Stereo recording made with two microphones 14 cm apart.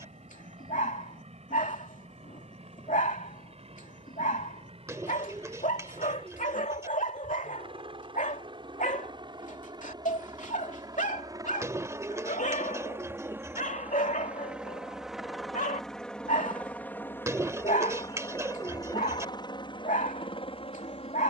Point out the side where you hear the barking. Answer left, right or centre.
left.